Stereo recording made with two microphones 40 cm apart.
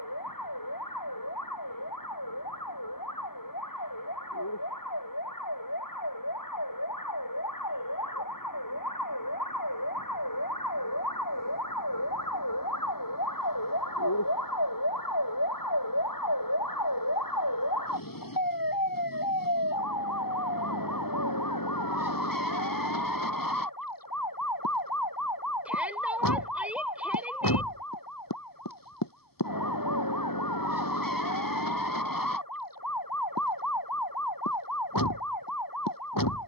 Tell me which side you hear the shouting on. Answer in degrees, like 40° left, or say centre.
centre.